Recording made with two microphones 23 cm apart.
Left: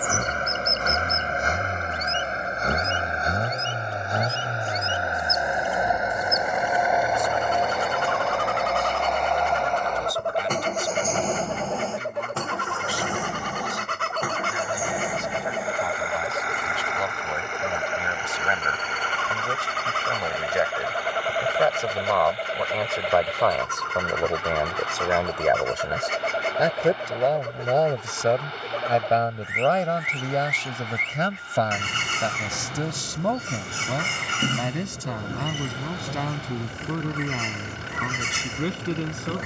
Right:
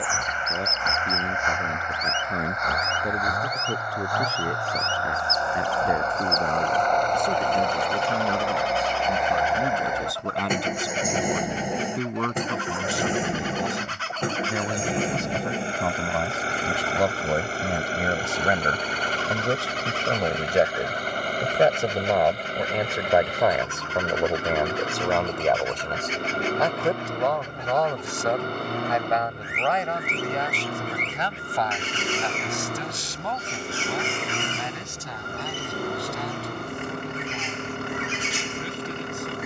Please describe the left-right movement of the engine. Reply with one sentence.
You can hear the engine travel towards the right.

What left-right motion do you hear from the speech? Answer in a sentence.
You can hear the speech go from the right side to the left.